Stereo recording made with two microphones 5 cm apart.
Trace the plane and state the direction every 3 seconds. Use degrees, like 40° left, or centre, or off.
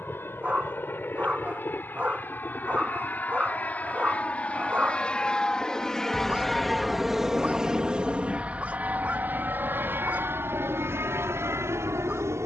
50° left, 30° left, 10° right, 50° right.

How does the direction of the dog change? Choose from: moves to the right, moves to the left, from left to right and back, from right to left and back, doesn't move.
doesn't move.